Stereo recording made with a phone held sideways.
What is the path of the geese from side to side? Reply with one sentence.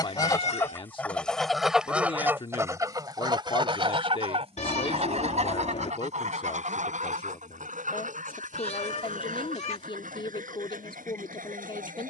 In this clip you hear the geese go from the left side to the right.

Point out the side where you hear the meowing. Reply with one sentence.
In this clip you hear the meowing on the left.